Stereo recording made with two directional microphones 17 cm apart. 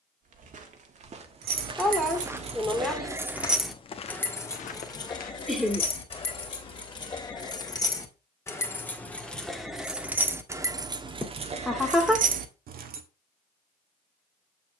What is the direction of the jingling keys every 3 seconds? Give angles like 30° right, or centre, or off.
50° right, 10° left, 20° left, 20° right, 60° right.